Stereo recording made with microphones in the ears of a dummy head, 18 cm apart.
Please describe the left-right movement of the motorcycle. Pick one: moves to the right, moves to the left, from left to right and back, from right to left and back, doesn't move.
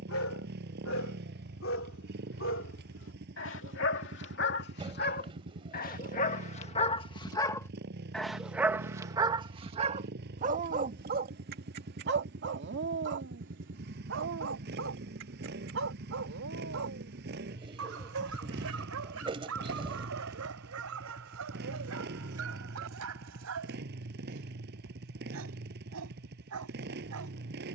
doesn't move.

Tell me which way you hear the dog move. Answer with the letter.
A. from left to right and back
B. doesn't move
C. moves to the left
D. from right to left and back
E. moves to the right
E.